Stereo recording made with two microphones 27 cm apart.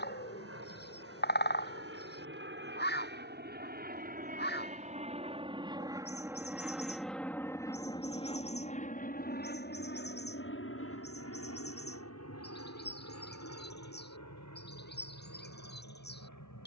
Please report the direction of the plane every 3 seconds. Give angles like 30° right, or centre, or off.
50° right, 30° right, 10° left, 40° left, 60° left, 70° left.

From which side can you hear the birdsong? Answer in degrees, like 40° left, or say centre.
40° left.